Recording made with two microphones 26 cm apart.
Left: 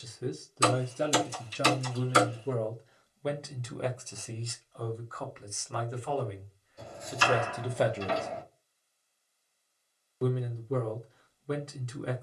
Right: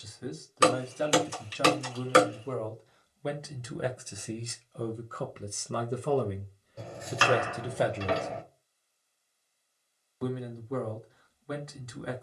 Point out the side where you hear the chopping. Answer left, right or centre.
right.